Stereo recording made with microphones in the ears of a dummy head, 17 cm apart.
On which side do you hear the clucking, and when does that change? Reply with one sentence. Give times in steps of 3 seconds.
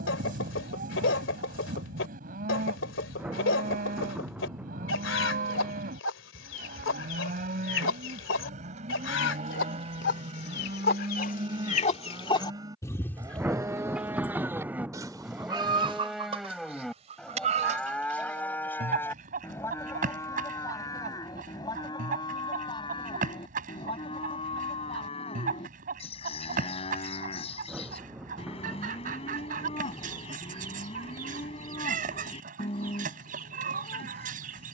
In this clip you hear the clucking on the left from 0 s, in the centre from 12 s and on the right from 15 s.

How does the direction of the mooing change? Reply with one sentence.
In this clip you hear the mooing go from the right side to the left.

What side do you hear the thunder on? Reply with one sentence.
In this clip you hear the thunder in the centre.